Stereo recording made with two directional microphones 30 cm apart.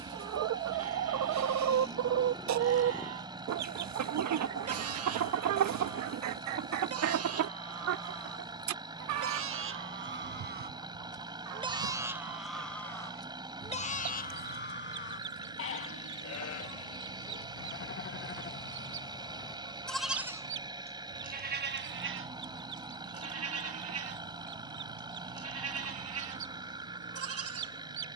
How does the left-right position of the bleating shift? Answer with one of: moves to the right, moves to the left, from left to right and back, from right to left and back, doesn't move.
from right to left and back.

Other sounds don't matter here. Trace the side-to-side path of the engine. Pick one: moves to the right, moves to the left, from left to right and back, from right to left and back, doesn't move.
doesn't move.